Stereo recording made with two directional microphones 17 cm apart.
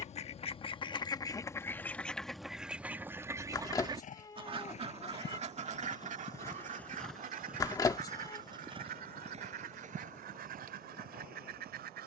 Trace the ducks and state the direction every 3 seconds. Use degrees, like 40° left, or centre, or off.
20° left, 30° right, 50° right, 60° right.